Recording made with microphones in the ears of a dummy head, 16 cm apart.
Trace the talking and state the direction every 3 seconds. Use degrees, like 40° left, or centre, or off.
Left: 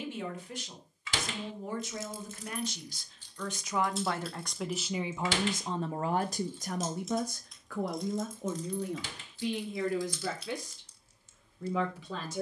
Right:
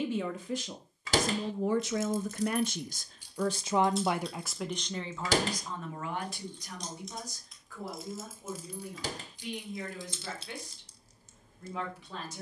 60° right, centre, 50° left, 60° left.